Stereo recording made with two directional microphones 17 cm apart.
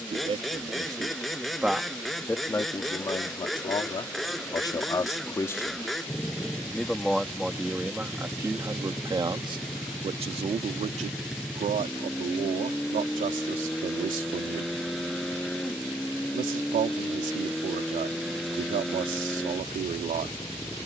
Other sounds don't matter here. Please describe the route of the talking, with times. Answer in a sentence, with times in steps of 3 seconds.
You can hear the talking in the centre from 0 s, on the left from 3 s, in the centre from 6 s and on the right from 9 s.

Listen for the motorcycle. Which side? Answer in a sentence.
You can hear the motorcycle in the centre.